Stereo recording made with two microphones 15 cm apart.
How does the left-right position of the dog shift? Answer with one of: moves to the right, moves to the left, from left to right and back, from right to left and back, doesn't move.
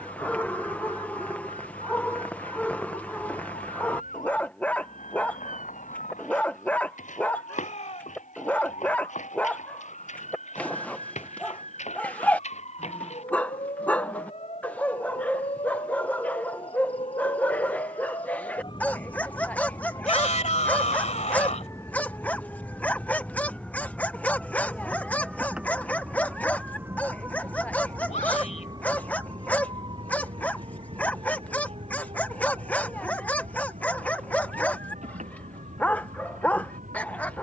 doesn't move.